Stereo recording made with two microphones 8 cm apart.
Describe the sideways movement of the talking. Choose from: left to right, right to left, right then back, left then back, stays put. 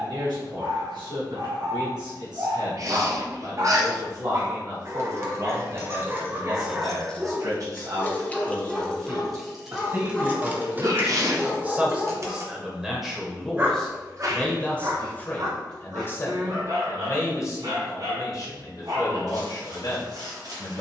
right to left.